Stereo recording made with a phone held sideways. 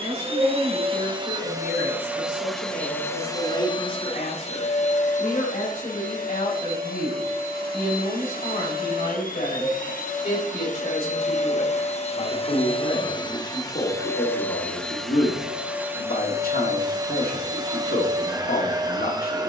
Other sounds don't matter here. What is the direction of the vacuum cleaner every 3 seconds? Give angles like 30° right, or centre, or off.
20° right, 40° left, 60° left, 50° left, 20° left, 20° right, 20° right.